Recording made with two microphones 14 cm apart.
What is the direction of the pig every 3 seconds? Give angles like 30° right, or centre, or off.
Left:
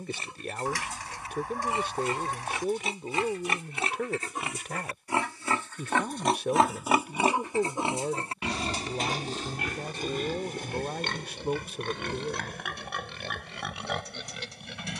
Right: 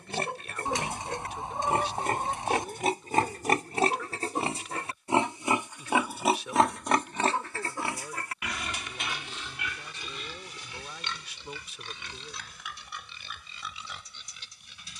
60° right, 30° right, 20° left, 50° left, 70° left.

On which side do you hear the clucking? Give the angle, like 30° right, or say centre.
20° right.